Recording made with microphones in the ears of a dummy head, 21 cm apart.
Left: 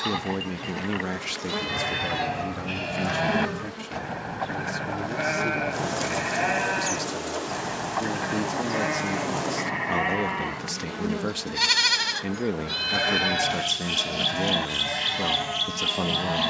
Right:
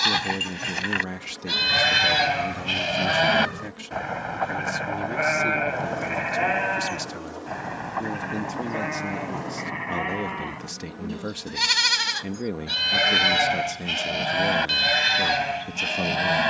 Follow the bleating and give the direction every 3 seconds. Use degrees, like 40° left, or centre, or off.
60° right, 30° right, 10° right, centre, 30° right, 60° right.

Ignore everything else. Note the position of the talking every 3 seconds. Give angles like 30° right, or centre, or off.
10° left, 10° right, centre, 10° left, 10° left, 10° left.